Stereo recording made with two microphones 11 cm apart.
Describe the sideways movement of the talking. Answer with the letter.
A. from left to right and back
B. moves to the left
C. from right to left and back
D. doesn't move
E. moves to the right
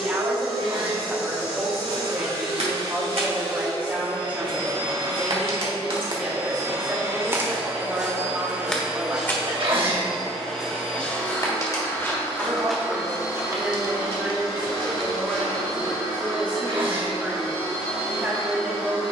D.